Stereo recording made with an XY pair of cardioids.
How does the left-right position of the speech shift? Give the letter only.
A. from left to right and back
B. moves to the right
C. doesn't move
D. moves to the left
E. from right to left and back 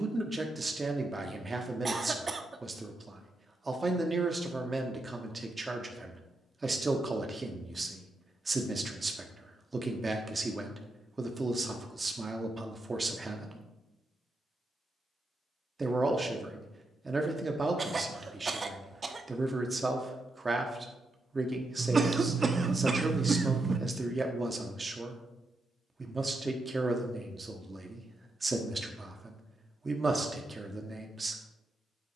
C.